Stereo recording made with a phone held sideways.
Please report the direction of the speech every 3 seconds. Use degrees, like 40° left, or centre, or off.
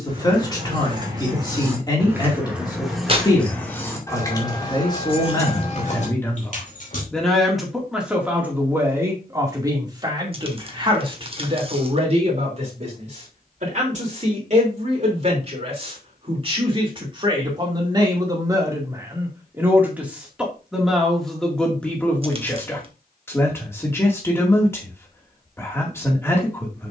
30° left, 20° left, centre, 30° right, 50° right, 40° right, 20° right, 10° left, 20° left.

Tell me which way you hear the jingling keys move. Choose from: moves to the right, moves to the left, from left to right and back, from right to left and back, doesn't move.
moves to the left.